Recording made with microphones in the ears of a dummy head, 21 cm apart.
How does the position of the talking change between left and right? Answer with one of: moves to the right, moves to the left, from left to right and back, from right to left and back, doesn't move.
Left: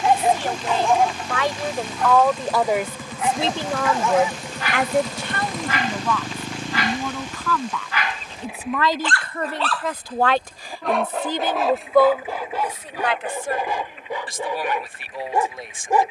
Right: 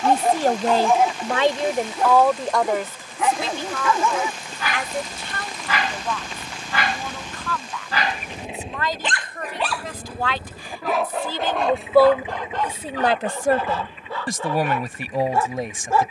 from right to left and back.